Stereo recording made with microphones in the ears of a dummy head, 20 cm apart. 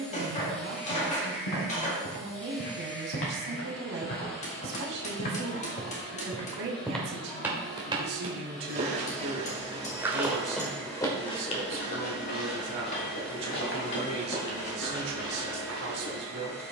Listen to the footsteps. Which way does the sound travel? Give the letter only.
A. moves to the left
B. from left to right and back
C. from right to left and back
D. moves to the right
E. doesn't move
B.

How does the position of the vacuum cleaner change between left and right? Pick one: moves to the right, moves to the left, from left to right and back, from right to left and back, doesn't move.
doesn't move.